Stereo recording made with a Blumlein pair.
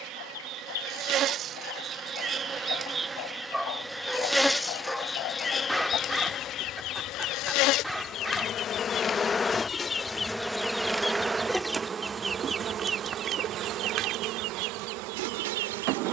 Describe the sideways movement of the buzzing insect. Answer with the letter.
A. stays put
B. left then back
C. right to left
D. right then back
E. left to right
B.